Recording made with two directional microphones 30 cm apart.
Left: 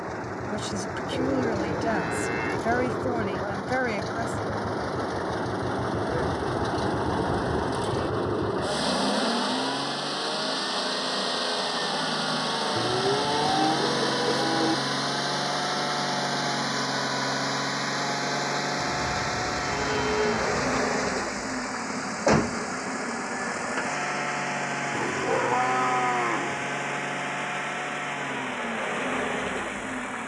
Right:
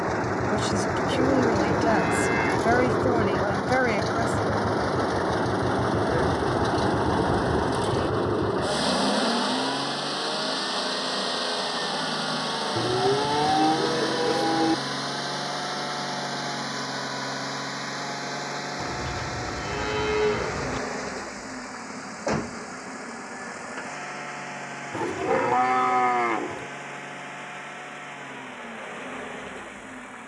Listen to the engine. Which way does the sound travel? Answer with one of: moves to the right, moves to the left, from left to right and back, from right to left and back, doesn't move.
moves to the left.